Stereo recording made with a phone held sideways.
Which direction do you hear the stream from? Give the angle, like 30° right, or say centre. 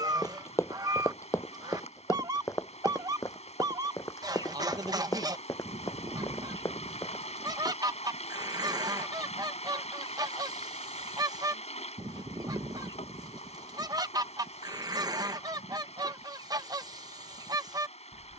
40° left.